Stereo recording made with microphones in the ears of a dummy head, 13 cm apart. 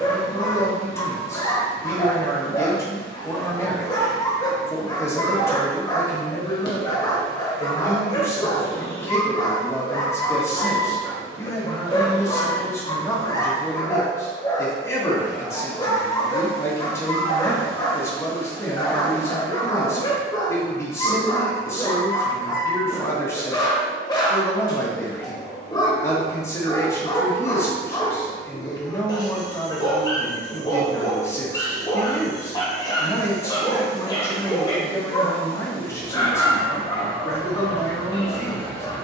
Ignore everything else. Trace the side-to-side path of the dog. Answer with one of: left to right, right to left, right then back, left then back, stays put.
stays put.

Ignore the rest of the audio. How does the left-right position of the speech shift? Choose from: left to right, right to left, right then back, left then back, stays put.
stays put.